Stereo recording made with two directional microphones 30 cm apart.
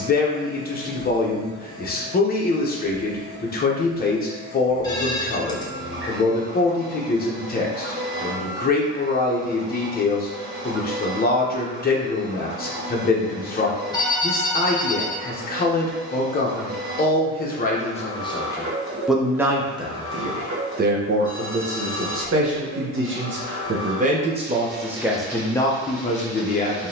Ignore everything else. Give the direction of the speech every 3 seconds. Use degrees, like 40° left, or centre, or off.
30° left, 30° left, 30° left, 30° left, 30° left, 30° left, 10° right, 40° right, centre.